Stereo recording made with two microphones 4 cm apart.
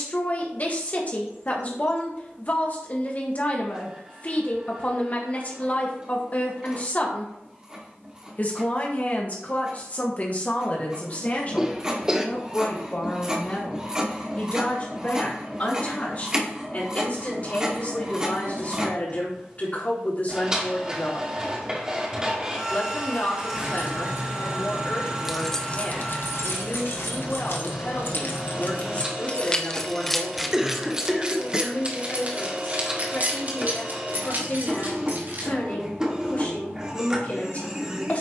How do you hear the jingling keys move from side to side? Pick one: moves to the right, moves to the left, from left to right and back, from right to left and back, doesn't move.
from right to left and back.